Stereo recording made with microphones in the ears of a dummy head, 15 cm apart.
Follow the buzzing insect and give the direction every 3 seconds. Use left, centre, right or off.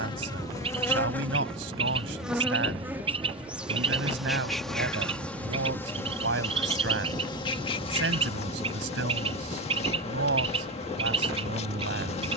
centre, centre, left, left.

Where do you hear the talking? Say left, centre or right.
right.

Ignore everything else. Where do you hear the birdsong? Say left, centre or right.
right.